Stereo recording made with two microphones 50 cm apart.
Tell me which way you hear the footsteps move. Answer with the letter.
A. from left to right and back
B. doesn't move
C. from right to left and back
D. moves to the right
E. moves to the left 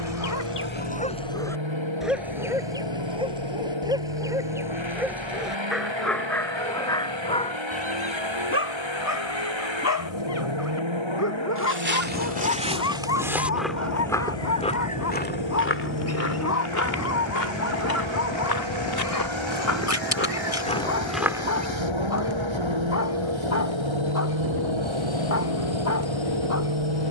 C.